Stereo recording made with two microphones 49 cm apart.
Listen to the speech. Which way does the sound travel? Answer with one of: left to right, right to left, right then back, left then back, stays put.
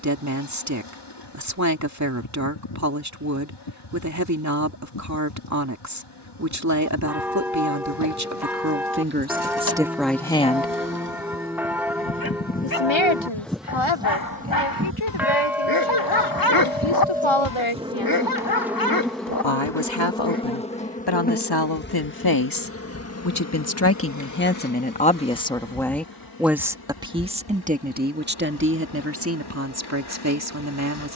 left then back.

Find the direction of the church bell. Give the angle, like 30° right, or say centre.
centre.